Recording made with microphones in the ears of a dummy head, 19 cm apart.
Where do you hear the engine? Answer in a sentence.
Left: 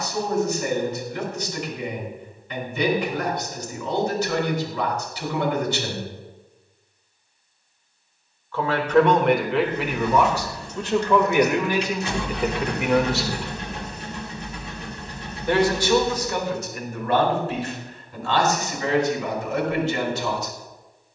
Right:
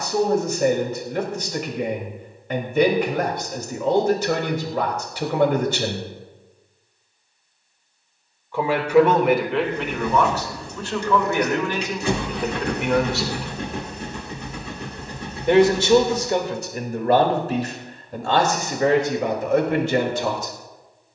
In this clip you hear the engine on the right.